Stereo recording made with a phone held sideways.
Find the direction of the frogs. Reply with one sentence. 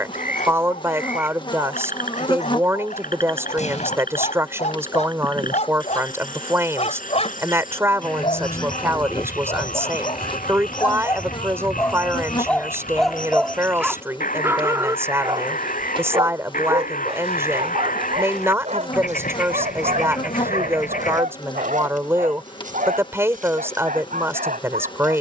In this clip you hear the frogs on the left.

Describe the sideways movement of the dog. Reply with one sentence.
You can hear the dog move to the right.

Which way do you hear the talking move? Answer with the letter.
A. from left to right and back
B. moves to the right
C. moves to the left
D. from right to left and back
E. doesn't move
E.